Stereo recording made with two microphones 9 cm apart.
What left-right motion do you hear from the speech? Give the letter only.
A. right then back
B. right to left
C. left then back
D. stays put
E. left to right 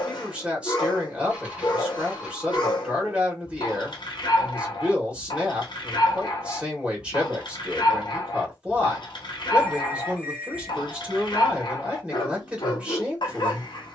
D.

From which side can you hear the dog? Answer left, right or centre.
left.